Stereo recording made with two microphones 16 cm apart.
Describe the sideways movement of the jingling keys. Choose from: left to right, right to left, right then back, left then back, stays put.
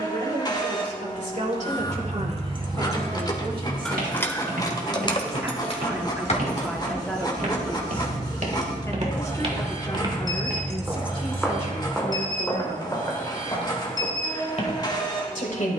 left then back.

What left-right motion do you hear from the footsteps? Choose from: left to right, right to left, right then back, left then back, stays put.
right to left.